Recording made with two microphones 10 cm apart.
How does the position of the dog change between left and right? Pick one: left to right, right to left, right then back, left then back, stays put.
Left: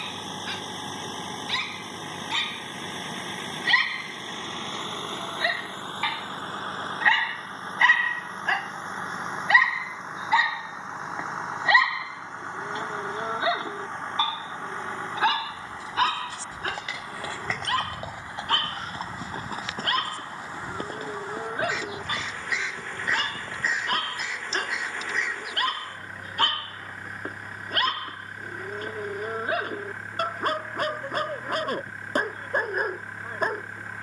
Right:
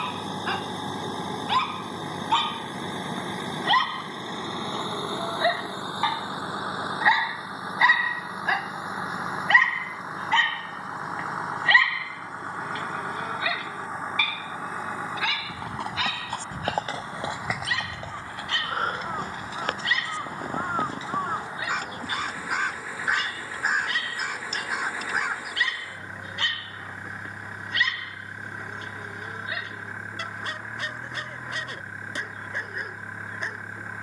right to left.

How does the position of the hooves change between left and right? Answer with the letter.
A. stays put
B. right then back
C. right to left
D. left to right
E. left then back
C.